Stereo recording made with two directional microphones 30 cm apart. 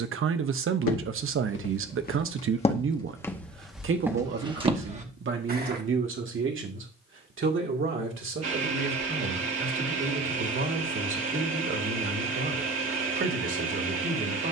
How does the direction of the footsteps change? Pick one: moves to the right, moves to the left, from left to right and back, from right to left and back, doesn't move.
moves to the right.